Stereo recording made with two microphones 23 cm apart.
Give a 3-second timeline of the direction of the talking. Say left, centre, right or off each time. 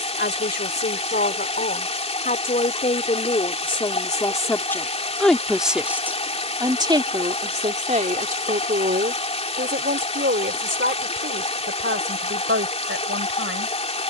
left, centre, right, right, right.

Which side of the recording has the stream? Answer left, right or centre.
left.